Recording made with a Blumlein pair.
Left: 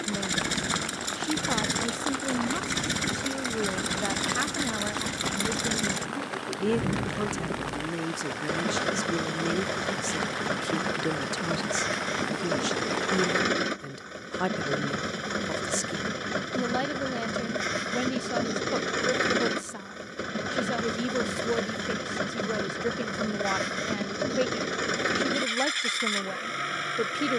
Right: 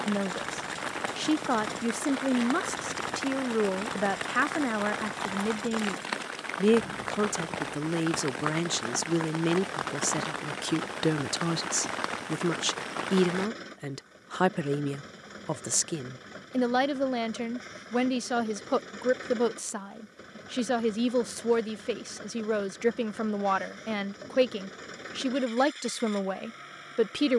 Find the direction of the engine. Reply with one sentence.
You can hear the engine on the left.